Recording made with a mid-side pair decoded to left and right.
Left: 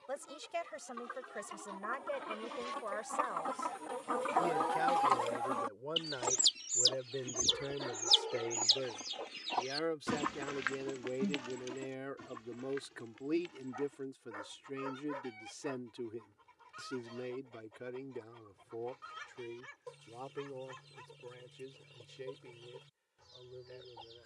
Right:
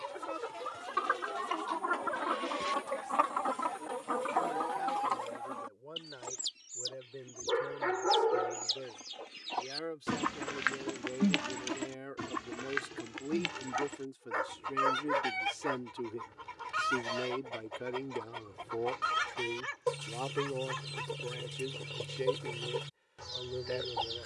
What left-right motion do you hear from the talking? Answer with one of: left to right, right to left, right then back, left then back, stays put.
left to right.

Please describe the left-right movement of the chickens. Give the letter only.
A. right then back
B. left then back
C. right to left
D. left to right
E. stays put
B.